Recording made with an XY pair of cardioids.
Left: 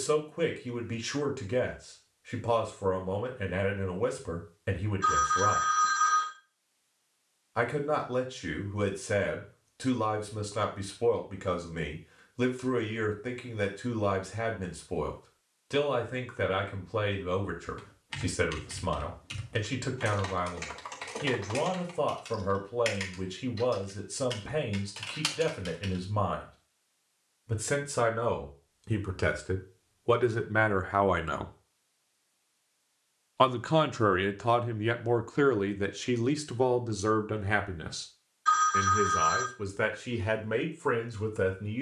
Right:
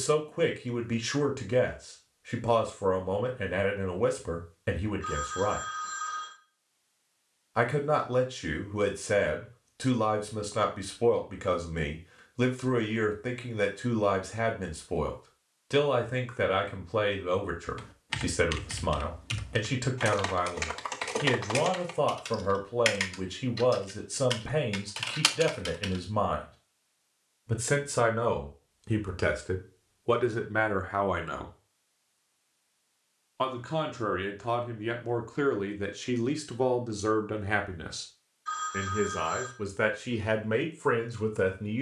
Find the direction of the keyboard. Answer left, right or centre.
right.